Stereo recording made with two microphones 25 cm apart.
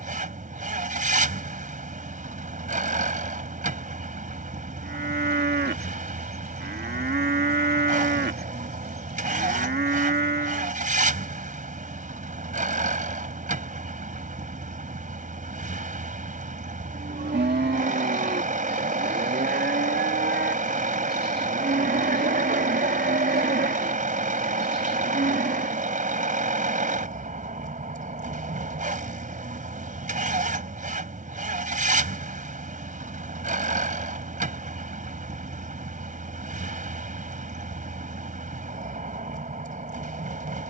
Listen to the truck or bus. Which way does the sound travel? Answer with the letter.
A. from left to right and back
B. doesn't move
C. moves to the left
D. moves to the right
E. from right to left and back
B.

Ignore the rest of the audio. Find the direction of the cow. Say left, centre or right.
right.